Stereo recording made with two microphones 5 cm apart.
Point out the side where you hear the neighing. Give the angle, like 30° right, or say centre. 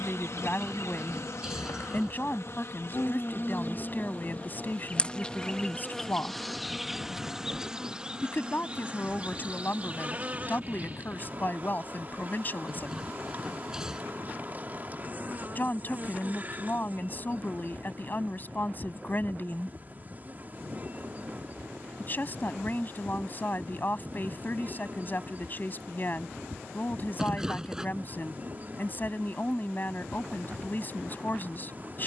10° right.